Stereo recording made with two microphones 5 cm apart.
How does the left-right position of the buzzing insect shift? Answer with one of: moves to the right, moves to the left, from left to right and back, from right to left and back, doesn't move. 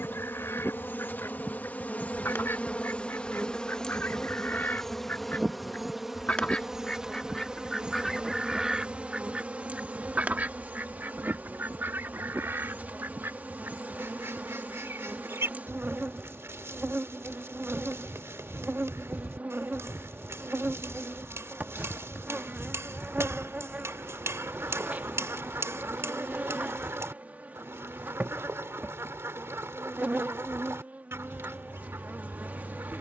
moves to the right.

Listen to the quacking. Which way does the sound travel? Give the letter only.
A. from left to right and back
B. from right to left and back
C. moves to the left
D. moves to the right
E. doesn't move
D.